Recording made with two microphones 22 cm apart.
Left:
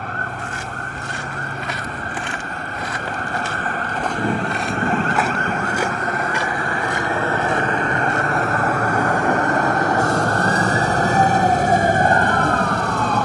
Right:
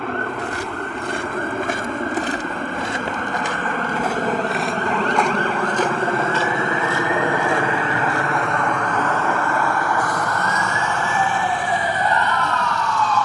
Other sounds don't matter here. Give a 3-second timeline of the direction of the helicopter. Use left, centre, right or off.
right, right, centre, left, left.